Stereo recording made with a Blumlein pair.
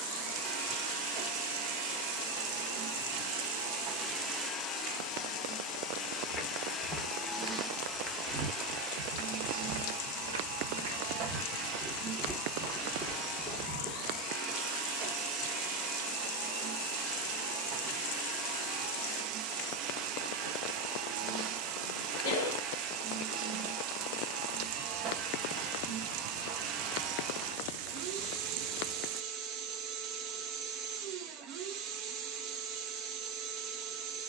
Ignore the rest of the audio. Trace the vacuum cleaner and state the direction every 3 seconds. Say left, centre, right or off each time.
right, centre, centre, right, right, right, right, right, right, right, right, right.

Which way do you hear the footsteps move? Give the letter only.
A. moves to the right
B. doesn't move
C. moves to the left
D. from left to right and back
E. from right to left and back
D.